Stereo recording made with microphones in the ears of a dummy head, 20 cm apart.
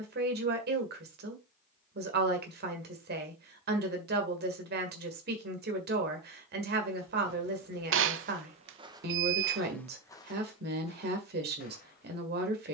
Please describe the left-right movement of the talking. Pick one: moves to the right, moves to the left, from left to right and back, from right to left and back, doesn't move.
doesn't move.